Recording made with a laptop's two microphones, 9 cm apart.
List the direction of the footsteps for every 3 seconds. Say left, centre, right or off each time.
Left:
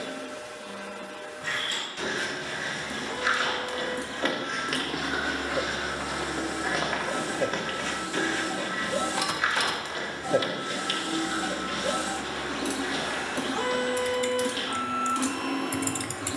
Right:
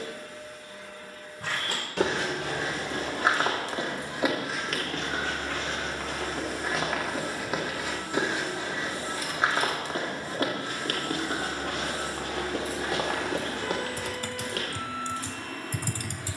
right, centre, centre, right, right, off.